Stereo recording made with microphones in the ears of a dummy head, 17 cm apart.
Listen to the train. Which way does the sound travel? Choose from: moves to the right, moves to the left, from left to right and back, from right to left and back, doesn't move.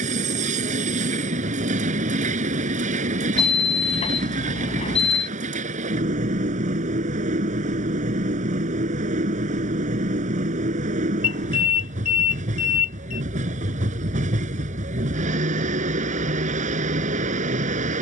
doesn't move.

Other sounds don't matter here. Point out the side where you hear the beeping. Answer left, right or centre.
left.